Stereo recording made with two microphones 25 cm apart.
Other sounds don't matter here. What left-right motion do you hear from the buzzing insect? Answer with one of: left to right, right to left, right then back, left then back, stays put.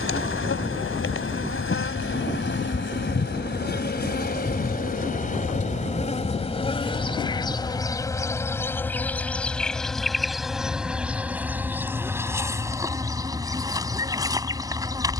left to right.